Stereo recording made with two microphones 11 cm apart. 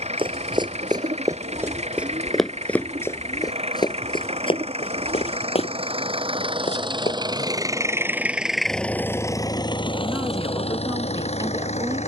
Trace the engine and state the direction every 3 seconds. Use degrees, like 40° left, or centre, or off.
70° right, 60° right, 30° right, 50° left.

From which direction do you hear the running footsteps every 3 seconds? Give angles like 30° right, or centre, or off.
20° right, 50° left, 70° left, off.